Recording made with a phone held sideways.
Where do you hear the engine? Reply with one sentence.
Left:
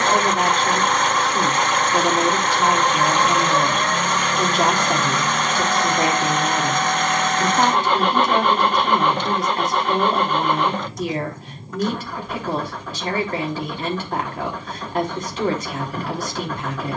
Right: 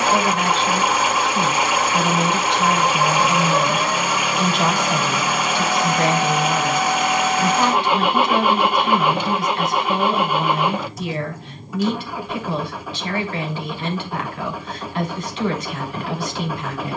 In this clip you hear the engine in the centre.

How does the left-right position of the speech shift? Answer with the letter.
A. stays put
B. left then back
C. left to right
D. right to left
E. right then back
A.